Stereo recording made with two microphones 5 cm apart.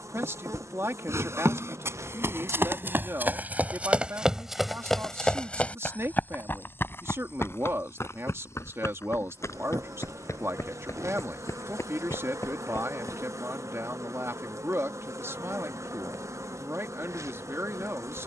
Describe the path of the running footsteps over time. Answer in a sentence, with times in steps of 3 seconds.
You can hear the running footsteps on the right from 0 s, in the centre from 3 s, on the left from 6 s and not at all from 15 s.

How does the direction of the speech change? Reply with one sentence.
In this clip you hear the speech stay put.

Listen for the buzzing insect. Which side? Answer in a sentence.
In this clip you hear the buzzing insect on the right.